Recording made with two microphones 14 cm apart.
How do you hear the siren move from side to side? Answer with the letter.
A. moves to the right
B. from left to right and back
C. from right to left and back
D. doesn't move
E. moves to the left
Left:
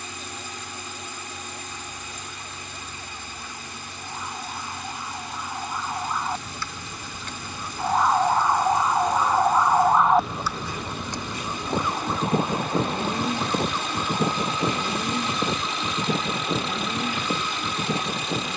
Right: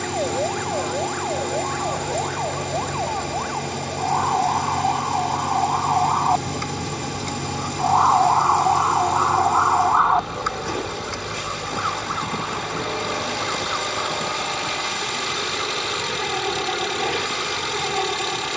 E.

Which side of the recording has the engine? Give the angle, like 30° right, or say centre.
70° right.